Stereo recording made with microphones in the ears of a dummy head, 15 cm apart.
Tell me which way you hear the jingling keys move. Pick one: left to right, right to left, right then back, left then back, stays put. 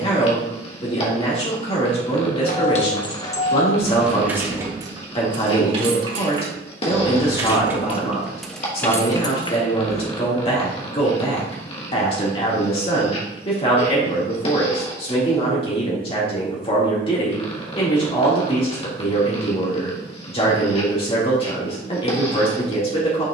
right then back.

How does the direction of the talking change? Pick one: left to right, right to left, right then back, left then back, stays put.
stays put.